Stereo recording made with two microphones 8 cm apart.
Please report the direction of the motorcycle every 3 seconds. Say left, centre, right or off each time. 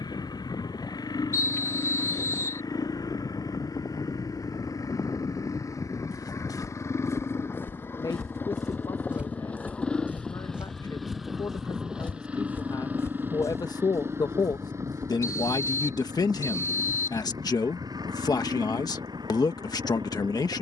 left, left, left, centre, right, right, right.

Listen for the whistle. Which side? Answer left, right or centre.
left.